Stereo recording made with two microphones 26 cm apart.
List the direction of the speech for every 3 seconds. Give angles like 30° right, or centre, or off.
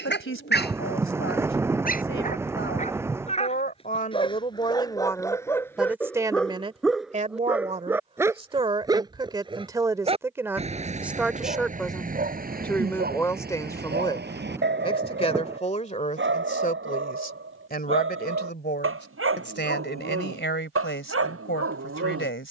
50° left, 20° left, 20° right, 10° right, 10° left, 30° left, 40° left, 50° left.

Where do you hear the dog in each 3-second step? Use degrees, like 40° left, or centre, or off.
40° left, 10° left, centre, 30° right, 40° right, 50° right, 60° right, 60° right.